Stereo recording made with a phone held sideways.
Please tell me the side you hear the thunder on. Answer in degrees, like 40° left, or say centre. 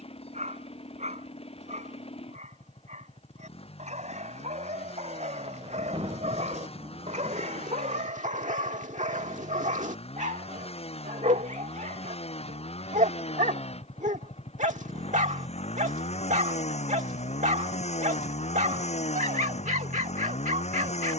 30° right.